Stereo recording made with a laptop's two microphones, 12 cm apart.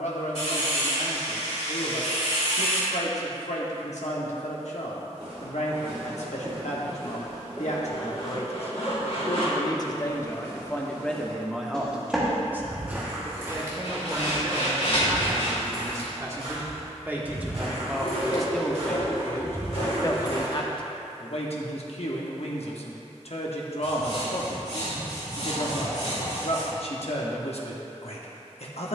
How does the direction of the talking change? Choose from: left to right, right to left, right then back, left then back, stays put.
right then back.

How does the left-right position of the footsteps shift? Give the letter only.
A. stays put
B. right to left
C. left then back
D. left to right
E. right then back
C.